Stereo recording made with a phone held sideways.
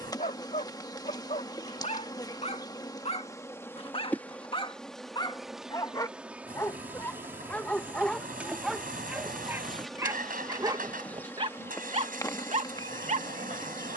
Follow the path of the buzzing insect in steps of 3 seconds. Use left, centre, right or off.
left, centre, centre, centre, left.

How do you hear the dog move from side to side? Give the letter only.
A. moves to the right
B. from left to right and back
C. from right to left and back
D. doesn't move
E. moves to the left
A.